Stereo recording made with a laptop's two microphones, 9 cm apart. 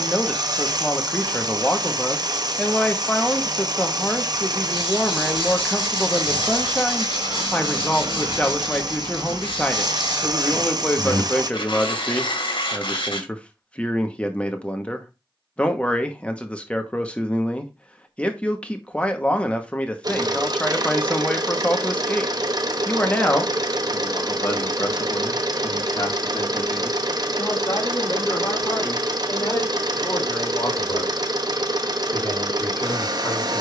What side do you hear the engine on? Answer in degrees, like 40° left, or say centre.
50° right.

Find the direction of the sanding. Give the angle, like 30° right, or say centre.
60° left.